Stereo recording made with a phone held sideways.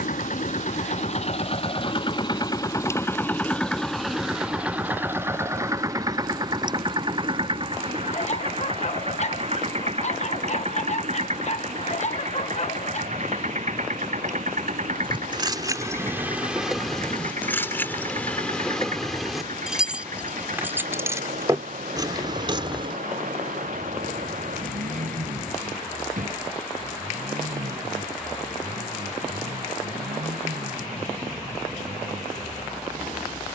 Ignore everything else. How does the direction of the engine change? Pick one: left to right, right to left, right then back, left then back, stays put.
left to right.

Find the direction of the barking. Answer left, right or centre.
left.